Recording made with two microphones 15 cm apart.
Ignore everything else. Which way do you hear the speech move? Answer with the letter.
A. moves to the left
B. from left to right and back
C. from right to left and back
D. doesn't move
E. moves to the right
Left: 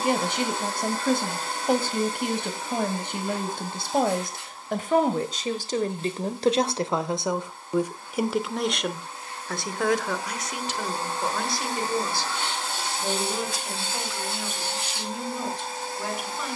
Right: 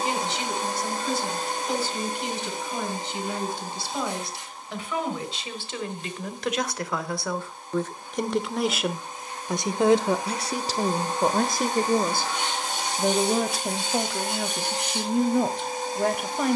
E.